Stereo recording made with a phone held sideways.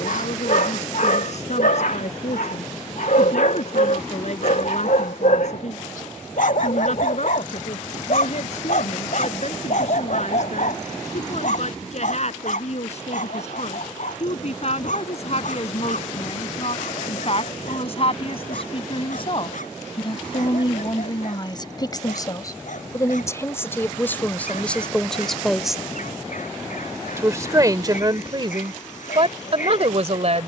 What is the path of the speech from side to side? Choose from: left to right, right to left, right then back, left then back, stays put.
left to right.